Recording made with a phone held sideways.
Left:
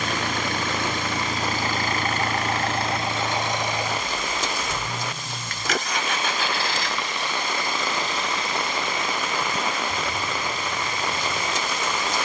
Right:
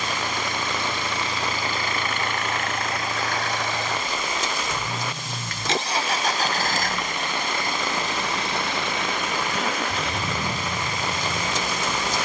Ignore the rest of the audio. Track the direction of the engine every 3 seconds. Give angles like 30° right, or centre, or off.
50° left, centre, 50° right, 70° right.